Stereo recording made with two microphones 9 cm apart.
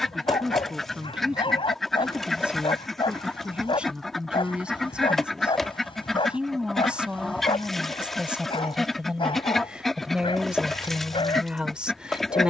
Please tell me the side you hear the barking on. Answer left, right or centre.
left.